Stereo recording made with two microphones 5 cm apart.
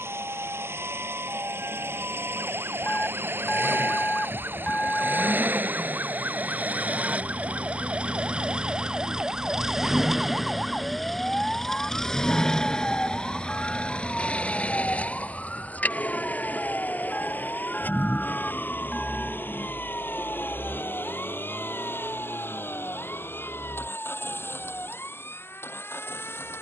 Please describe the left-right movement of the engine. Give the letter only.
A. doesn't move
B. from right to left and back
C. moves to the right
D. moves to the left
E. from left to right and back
D.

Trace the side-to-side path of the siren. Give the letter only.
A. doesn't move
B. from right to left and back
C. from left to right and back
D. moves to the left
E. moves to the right
D.